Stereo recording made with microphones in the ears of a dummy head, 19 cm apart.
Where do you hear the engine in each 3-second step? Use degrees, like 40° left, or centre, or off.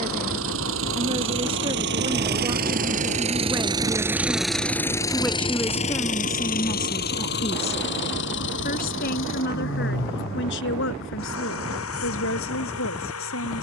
60° right, centre, 50° left, 60° left, 70° left.